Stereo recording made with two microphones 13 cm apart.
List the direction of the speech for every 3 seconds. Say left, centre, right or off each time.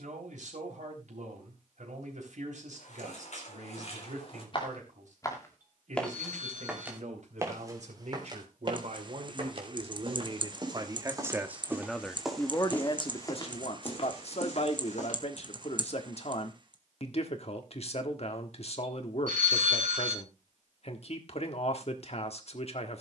right, right, right, right, left, left, left, left.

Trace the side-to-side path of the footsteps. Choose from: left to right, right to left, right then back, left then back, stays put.
right then back.